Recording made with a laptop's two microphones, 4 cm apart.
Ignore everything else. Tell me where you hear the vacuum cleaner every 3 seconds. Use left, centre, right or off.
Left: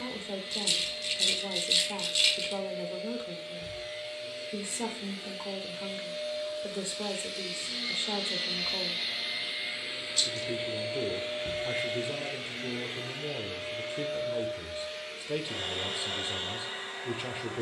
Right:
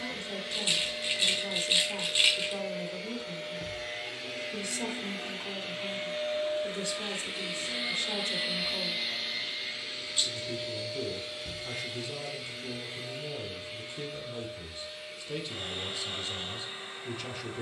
right, right, right, left, left, left.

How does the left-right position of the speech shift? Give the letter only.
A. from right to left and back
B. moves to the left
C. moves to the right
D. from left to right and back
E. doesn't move
E.